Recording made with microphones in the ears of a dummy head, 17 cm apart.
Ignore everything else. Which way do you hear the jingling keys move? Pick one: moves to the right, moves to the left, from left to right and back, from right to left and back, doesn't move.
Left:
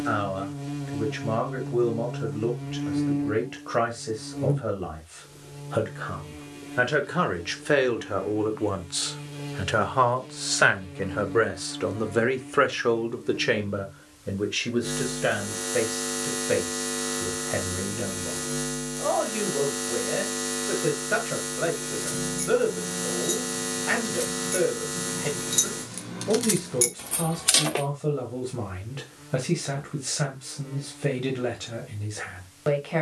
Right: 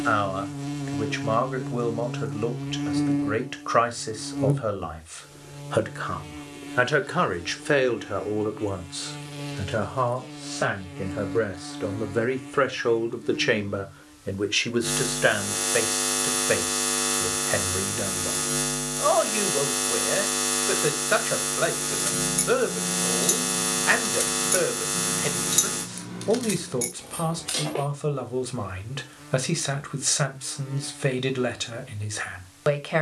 moves to the left.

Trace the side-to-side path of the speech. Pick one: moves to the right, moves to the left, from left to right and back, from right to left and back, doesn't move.
from right to left and back.